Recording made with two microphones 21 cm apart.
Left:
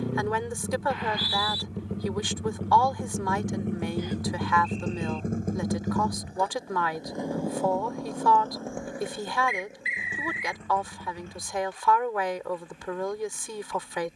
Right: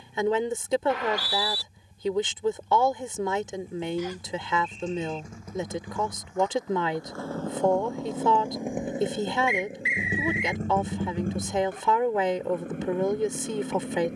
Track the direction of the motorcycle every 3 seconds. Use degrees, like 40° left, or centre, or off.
80° left, 60° left, 10° left, 40° right, 50° right.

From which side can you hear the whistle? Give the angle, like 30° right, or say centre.
70° right.